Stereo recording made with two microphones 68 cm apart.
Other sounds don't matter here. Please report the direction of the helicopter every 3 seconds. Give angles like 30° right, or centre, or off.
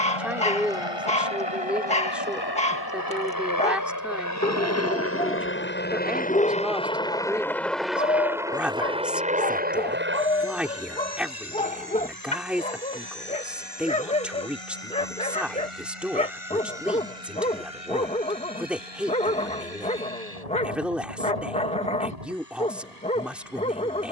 40° left, 20° left, centre, 20° right, 30° right, 50° right, 50° right, 60° right.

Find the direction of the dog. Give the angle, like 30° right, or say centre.
10° left.